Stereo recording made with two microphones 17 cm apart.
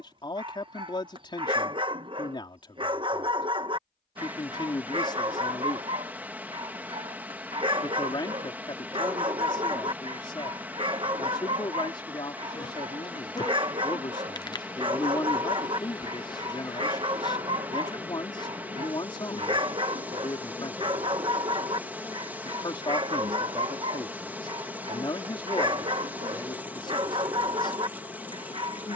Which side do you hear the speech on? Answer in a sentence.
In this clip you hear the speech on the left.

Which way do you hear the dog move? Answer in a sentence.
In this clip you hear the dog stay put.